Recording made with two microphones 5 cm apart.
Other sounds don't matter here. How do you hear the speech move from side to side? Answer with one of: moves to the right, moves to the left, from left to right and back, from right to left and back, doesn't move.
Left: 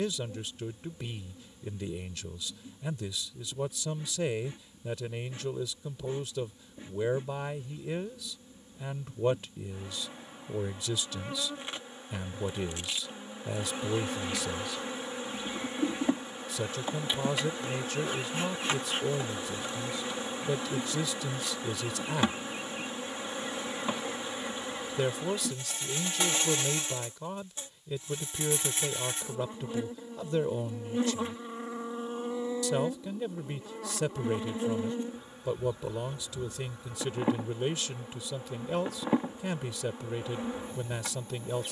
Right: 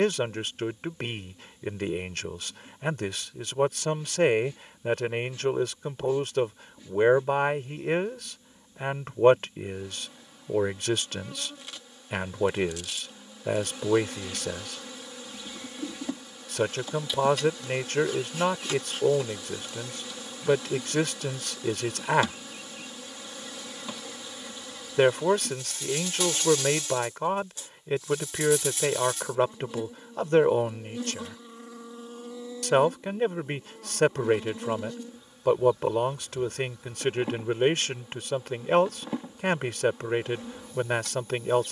doesn't move.